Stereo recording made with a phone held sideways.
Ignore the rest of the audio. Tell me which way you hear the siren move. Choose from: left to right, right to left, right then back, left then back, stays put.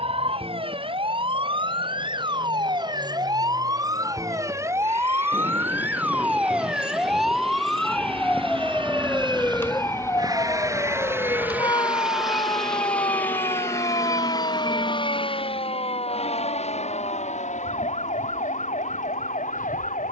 right to left.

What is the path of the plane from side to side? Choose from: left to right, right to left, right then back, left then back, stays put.
right to left.